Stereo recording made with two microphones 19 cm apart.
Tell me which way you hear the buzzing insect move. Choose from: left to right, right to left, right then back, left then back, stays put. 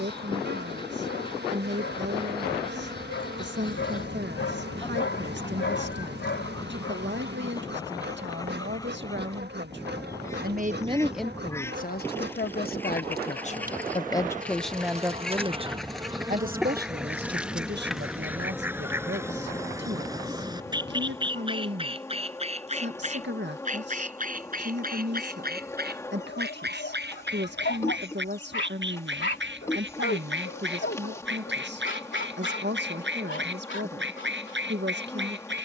right to left.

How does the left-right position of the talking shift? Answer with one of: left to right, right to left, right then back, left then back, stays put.
left then back.